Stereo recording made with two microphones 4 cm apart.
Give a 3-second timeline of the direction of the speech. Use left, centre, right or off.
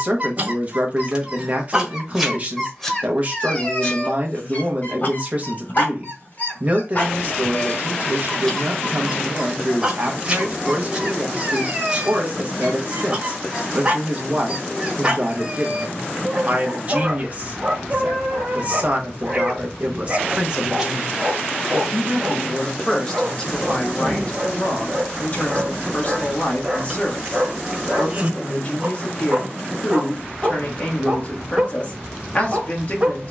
right, right, right, right, right, right, right, centre, left, left, left.